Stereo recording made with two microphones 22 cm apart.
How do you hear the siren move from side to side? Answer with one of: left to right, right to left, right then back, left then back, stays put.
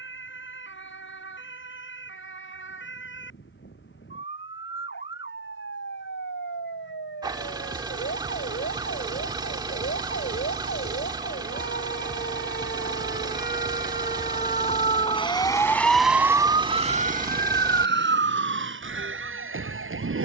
left to right.